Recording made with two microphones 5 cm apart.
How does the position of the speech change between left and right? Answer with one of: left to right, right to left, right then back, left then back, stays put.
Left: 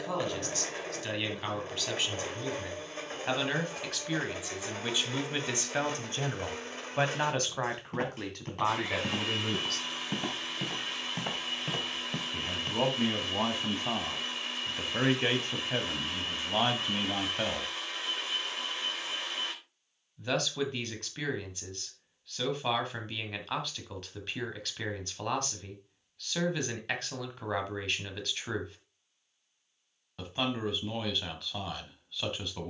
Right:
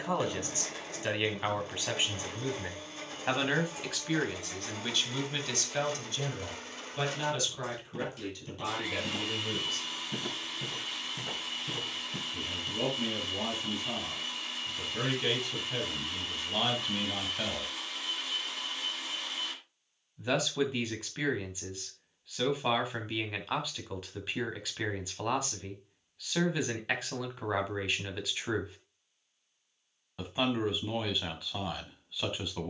left then back.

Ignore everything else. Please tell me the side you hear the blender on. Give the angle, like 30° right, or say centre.
30° left.